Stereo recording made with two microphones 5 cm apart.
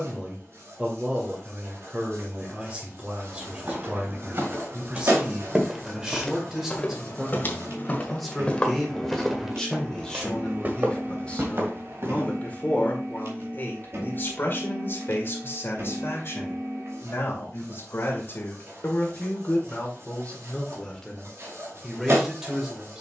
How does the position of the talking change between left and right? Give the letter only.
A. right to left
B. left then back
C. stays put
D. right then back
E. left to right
B.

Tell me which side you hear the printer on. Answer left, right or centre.
right.